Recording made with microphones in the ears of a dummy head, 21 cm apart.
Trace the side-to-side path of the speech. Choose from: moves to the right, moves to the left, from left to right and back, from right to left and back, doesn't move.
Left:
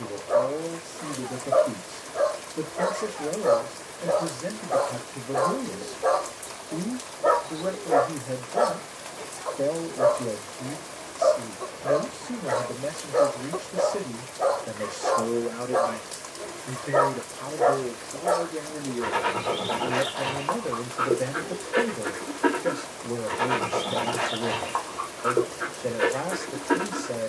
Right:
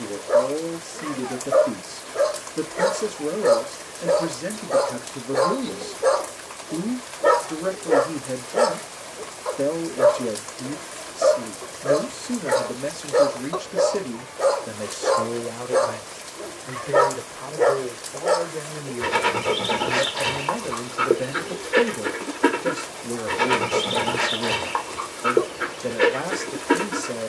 from right to left and back.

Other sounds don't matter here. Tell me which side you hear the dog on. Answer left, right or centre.
right.